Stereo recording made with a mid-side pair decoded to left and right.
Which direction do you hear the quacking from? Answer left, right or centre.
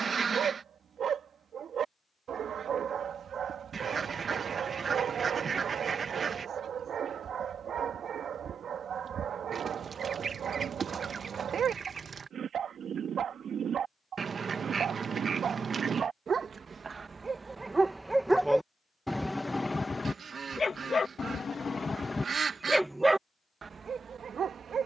right.